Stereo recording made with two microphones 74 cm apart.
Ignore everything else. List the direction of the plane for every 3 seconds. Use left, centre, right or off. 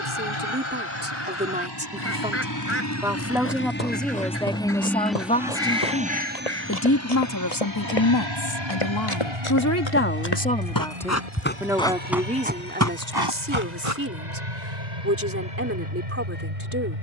left, centre, right, right, right, right.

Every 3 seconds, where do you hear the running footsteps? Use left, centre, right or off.
off, left, left, left, right, off.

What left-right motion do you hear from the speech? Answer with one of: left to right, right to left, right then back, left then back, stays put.
left then back.